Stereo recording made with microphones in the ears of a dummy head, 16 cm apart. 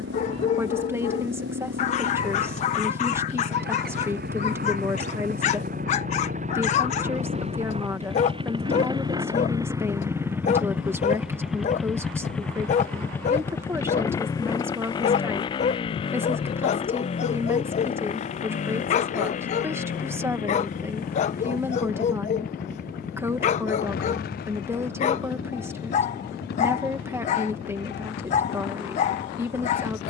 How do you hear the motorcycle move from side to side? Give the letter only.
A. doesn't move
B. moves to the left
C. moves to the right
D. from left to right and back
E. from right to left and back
B.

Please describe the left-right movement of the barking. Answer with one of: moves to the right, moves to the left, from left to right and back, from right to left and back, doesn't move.
doesn't move.